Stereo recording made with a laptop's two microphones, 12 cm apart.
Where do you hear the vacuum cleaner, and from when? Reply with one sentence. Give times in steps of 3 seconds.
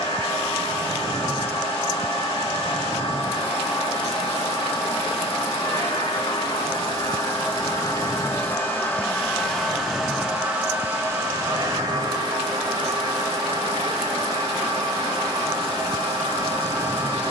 You can hear the vacuum cleaner on the left from 0 s, in the centre from 9 s and on the right from 12 s.